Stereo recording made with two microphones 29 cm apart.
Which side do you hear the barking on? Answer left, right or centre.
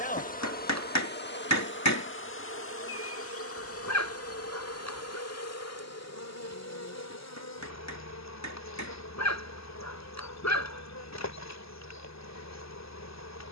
left.